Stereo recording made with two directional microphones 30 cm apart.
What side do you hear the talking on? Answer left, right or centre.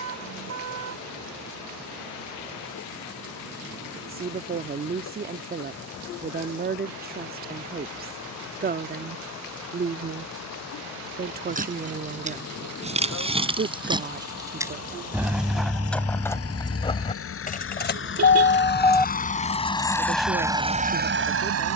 right.